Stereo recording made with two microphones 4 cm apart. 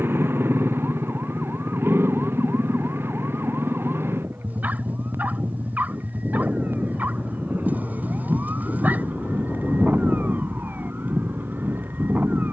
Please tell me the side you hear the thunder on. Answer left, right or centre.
left.